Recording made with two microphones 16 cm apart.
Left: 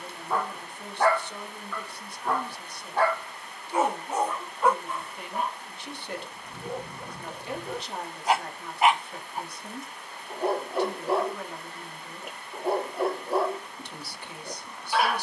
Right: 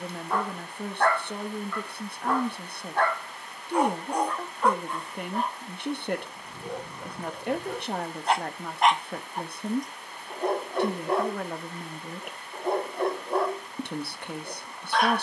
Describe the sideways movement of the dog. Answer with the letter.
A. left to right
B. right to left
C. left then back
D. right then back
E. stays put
E.